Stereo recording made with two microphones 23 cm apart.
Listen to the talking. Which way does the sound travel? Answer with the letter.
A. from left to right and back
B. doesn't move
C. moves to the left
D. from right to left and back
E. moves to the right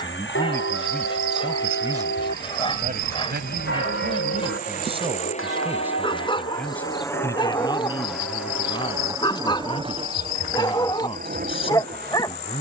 A.